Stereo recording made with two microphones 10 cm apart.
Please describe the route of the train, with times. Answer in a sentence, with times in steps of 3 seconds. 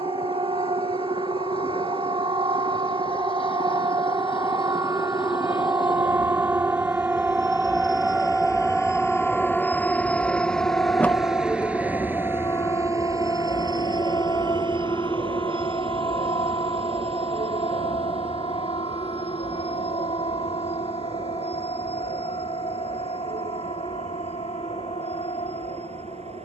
In this clip you hear the train on the left from 0 s, in the centre from 9 s and on the right from 12 s.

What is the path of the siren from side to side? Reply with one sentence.
In this clip you hear the siren move from right to left.